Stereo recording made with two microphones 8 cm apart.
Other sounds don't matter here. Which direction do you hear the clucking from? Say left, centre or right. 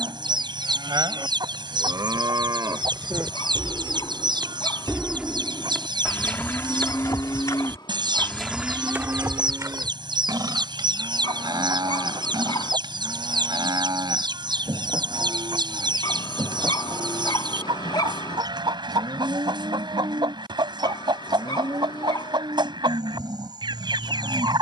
right.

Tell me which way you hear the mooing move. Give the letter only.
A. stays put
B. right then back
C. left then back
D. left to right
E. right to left
C.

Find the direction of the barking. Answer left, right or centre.
left.